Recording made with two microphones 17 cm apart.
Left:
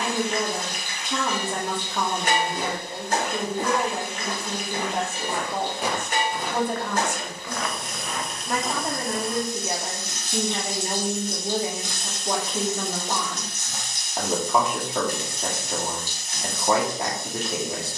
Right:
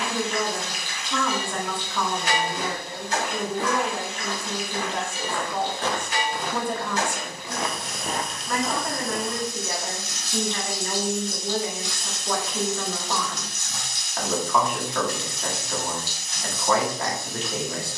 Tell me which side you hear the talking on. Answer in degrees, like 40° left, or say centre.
20° left.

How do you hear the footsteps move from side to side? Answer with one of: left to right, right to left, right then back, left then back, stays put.
left to right.